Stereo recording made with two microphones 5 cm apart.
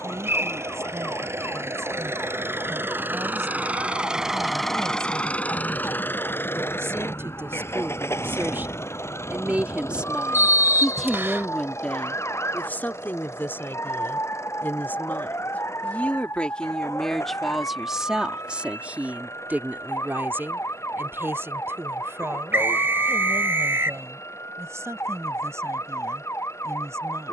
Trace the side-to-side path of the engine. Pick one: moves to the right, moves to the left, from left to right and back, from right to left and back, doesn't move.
moves to the left.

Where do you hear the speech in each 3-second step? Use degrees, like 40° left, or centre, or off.
80° right, 70° right, 60° right, 10° right, 50° left, 20° left, 40° right, 70° right, 70° right.